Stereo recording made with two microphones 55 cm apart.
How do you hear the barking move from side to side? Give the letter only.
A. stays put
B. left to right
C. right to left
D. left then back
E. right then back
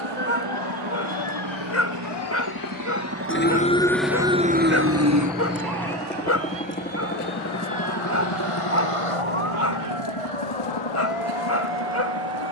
A.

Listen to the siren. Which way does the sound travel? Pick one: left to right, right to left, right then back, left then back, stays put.
left to right.